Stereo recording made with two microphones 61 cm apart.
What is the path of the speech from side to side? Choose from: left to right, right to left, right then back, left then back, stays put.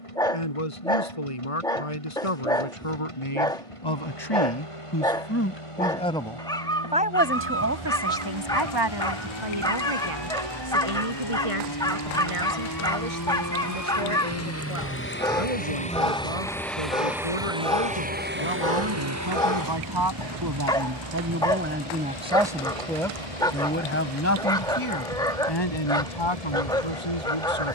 right then back.